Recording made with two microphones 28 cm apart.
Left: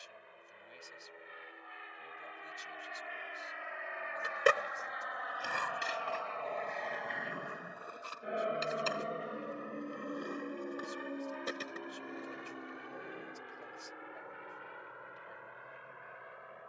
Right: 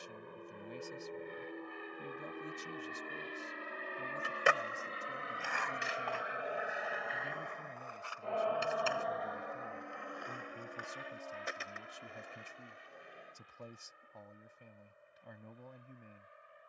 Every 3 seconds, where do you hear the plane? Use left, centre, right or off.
right, right, centre, left, left, left.